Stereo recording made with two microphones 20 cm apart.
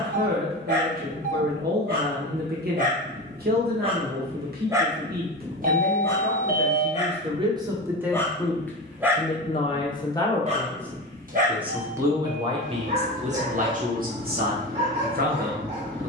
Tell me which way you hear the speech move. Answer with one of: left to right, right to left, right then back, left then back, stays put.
left then back.